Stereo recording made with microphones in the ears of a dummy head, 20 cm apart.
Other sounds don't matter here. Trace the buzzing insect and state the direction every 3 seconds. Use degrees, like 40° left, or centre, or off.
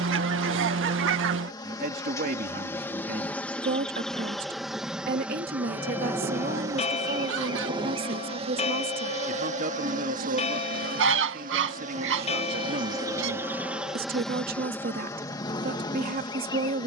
10° left, centre, 20° right, 40° right, 10° right, 20° left.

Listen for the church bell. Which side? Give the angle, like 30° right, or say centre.
30° left.